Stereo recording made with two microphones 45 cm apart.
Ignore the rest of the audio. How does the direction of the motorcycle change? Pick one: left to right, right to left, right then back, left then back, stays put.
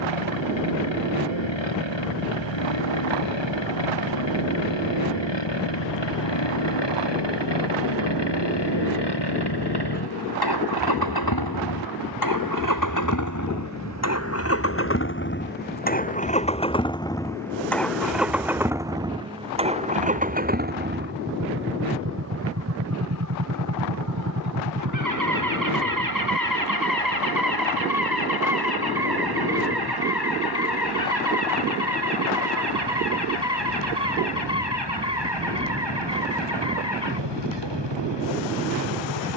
left to right.